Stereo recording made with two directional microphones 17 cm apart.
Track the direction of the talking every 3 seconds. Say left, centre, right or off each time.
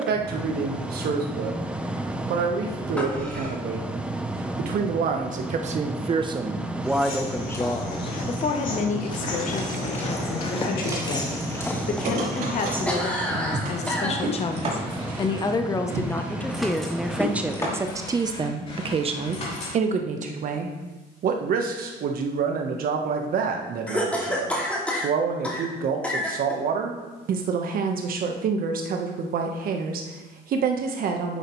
right, right, centre, left, left, centre, right, right, right, right, right.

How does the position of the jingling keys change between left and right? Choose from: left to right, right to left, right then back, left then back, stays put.
right then back.